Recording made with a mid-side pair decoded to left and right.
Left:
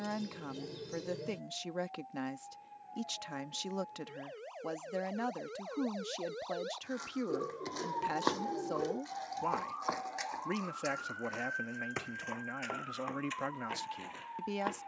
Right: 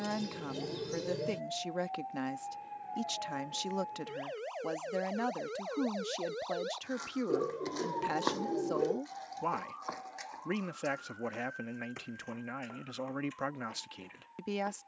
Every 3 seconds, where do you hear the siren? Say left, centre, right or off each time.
right, right, centre, left, left.